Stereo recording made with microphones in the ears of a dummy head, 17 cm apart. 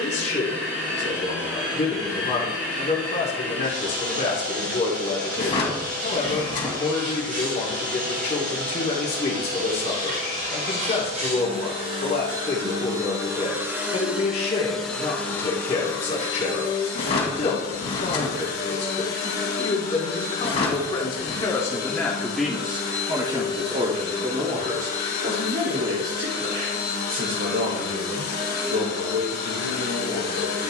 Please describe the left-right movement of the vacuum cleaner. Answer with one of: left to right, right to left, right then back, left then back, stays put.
right to left.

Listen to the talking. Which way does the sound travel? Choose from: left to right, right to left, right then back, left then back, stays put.
left to right.